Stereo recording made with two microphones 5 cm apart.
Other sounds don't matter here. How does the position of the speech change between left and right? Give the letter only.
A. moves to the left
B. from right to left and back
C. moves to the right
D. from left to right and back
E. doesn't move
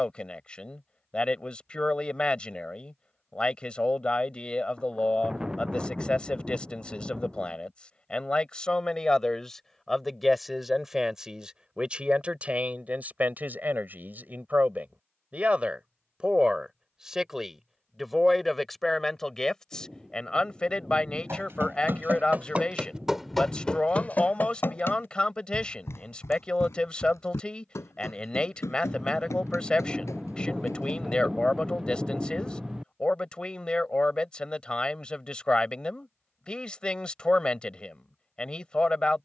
D.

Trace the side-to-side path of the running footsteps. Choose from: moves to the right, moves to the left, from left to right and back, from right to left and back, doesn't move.
moves to the left.